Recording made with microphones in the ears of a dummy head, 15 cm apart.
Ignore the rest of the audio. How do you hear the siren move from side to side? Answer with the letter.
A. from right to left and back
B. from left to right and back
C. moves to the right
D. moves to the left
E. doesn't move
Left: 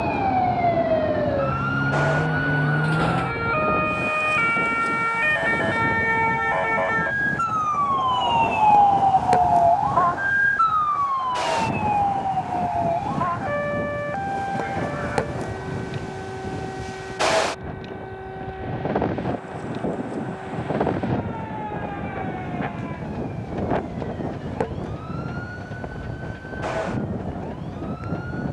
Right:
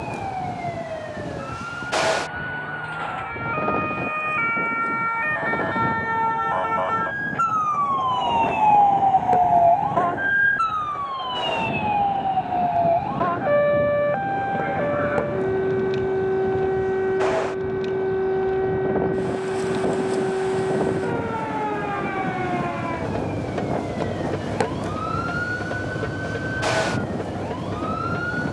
C.